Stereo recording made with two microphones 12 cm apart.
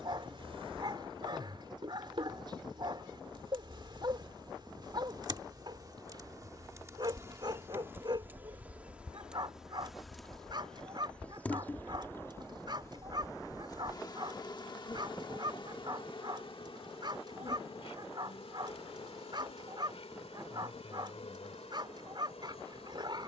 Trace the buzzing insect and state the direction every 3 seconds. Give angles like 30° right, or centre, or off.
50° right, 40° right, 20° right, centre, 30° left, 50° left, 60° left, 70° left.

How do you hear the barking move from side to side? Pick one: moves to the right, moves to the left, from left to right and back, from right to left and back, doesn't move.
doesn't move.